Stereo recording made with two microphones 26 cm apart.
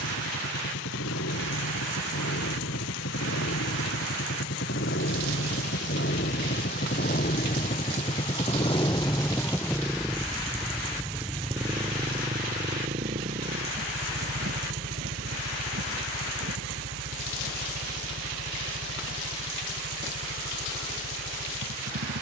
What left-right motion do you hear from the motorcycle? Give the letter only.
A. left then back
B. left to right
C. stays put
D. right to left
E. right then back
B.